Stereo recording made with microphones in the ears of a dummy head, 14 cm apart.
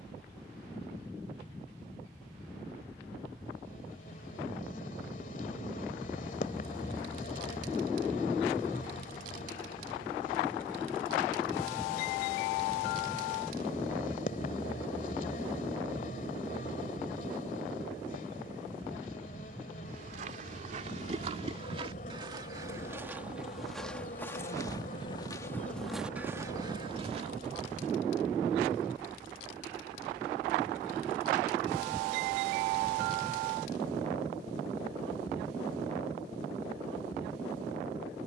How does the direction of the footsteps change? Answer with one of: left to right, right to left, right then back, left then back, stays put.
left then back.